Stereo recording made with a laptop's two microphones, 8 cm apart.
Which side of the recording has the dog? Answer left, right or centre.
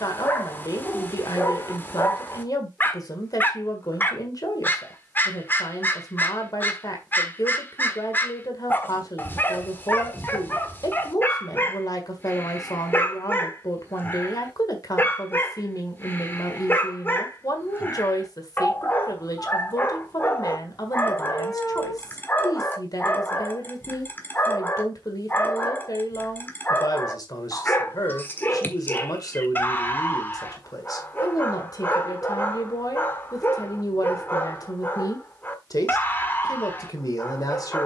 left.